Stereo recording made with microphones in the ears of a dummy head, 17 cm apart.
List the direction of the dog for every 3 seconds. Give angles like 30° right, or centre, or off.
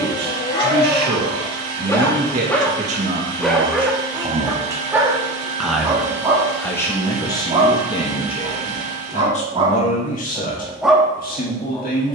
20° left, 10° right, 30° right, 10° right.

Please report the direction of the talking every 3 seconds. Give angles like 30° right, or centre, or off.
50° right, 20° right, 20° left, 40° left.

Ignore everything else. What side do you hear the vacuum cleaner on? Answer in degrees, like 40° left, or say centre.
70° right.